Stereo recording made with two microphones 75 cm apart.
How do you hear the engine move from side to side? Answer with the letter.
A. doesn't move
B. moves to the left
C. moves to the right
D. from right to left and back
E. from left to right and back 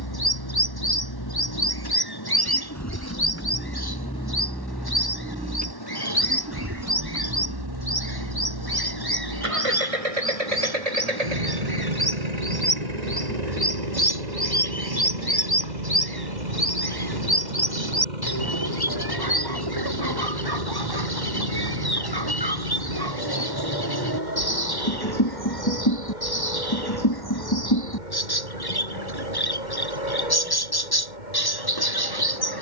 C.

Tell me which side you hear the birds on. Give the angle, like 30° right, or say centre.
30° left.